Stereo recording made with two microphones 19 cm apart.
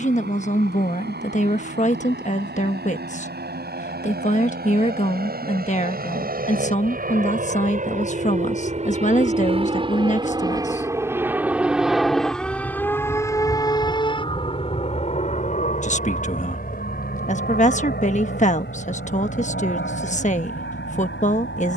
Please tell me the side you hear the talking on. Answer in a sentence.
You can hear the talking on the left.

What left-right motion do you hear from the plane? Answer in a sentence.
In this clip you hear the plane go from the right side to the left.